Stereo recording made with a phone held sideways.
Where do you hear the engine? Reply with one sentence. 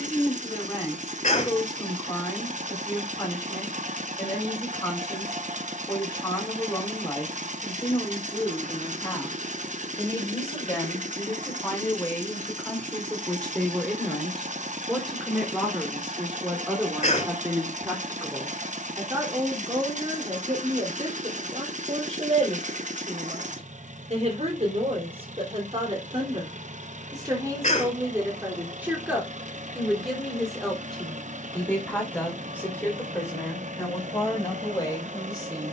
In this clip you hear the engine on the right.